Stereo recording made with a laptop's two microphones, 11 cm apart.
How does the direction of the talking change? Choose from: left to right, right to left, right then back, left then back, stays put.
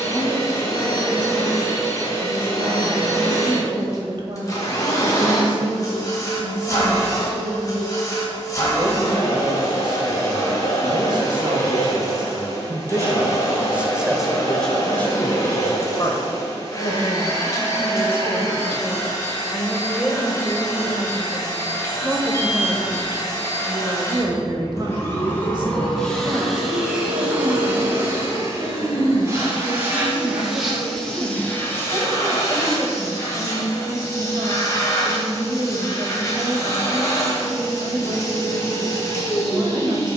left then back.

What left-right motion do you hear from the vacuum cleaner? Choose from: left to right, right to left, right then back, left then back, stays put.
right then back.